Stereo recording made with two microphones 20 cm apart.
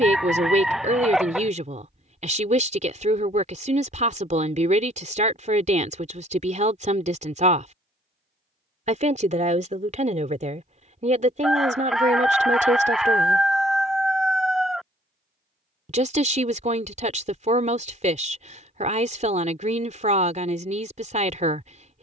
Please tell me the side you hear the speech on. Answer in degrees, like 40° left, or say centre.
30° right.